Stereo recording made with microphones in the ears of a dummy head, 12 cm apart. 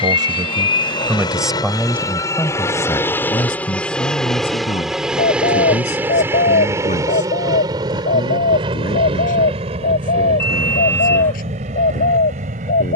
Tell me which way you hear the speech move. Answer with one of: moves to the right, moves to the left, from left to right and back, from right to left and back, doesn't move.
moves to the left.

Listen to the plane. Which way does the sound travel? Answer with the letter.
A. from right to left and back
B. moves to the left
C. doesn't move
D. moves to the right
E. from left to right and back
D.